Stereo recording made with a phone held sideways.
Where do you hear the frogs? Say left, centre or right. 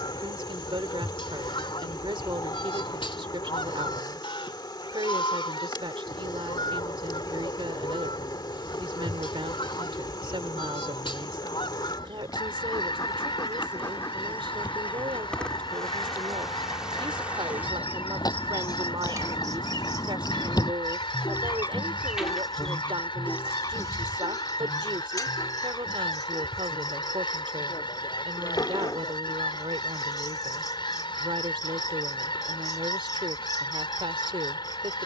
left.